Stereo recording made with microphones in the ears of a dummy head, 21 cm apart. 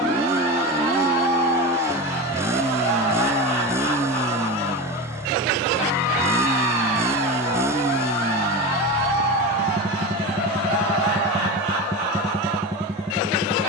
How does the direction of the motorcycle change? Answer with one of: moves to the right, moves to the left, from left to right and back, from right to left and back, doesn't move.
doesn't move.